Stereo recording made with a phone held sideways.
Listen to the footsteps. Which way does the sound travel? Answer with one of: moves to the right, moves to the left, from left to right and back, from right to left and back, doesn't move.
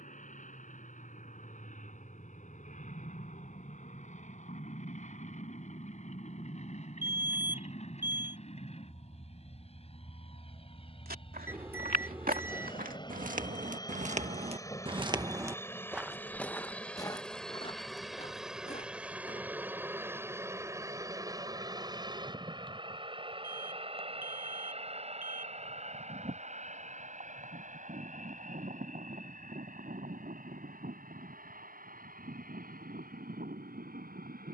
moves to the left.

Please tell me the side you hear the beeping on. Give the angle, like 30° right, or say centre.
10° right.